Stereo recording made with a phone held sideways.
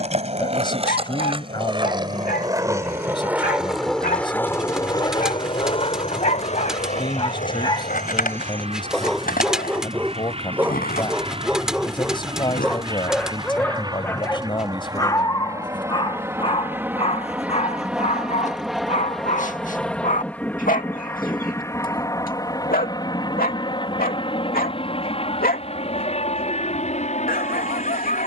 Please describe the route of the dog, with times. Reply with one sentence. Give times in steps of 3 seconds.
In this clip you hear the dog on the left from 0 s, in the centre from 9 s and on the left from 15 s.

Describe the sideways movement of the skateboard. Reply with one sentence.
In this clip you hear the skateboard go from the right side to the left.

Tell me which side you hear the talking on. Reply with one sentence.
In this clip you hear the talking on the left.